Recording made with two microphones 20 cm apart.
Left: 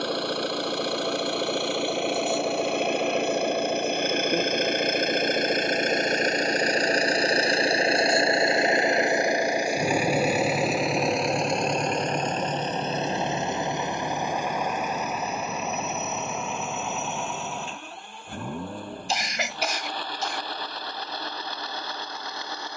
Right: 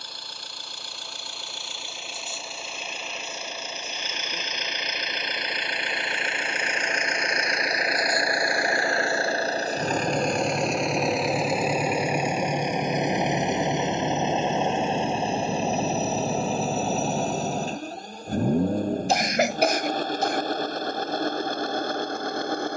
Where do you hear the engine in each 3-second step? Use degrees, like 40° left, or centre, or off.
70° left, 50° left, 30° left, 10° left, 20° right, 30° right, 40° right, 50° right.